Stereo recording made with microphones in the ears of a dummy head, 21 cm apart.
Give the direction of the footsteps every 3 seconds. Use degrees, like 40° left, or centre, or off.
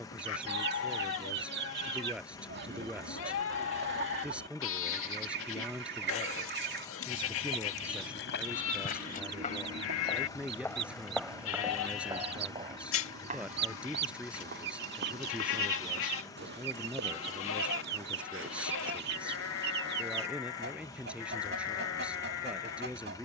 off, off, 50° left, 10° left, 30° right, 50° right, 60° right, off.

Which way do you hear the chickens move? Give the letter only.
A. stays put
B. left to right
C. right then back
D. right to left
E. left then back
A.